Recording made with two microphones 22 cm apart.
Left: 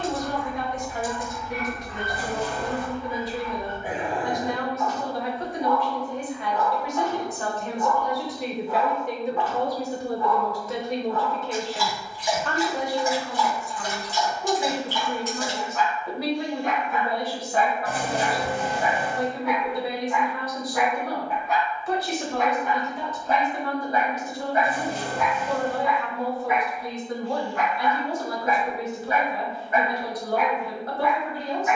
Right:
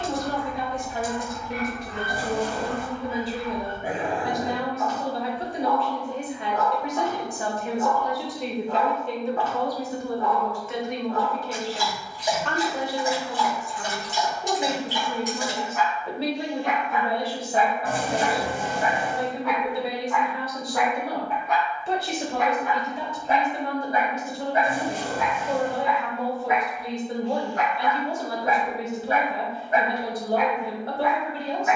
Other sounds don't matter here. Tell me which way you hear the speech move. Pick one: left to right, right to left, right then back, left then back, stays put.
left then back.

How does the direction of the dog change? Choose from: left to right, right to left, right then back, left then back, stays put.
left then back.